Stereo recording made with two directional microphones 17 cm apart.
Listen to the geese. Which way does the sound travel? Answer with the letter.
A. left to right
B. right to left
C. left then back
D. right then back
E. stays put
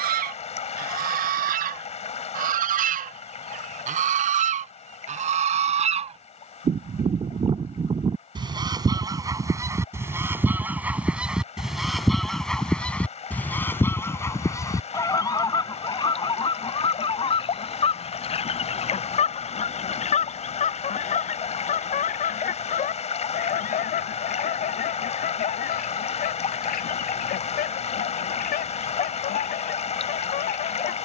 B.